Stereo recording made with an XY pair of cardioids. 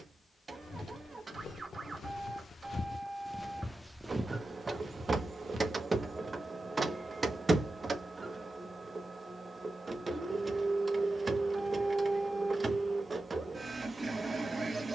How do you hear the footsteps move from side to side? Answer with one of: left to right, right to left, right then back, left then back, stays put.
left to right.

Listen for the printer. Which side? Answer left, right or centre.
right.